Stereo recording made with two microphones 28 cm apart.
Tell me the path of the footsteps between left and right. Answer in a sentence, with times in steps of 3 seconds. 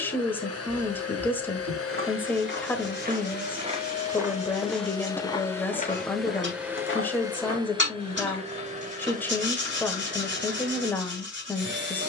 You can hear the footsteps on the right from 0 s, in the centre from 3 s, on the left from 6 s and not at all from 9 s.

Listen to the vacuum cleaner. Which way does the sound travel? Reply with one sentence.
You can hear the vacuum cleaner move from left to right.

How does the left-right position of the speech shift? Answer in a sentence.
In this clip you hear the speech stay put.